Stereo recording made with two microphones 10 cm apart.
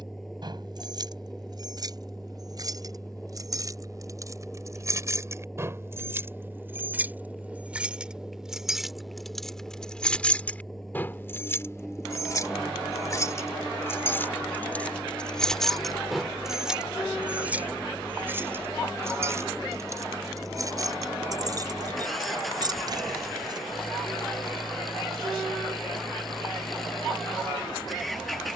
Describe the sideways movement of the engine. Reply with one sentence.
You can hear the engine stay in one place.